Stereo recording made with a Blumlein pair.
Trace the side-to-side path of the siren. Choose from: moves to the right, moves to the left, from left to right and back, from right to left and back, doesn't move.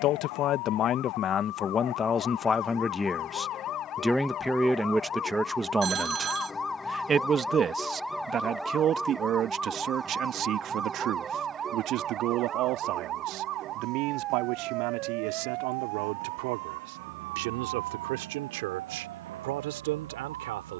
moves to the right.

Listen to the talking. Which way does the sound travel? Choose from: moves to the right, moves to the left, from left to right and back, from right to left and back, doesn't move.
moves to the right.